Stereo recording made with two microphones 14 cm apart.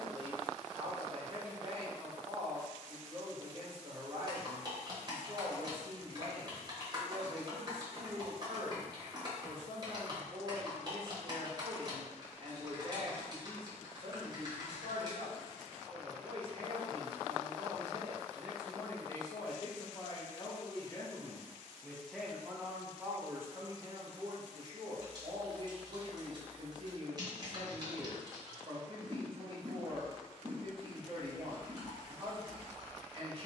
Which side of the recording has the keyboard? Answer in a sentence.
In this clip you hear the keyboard on the right.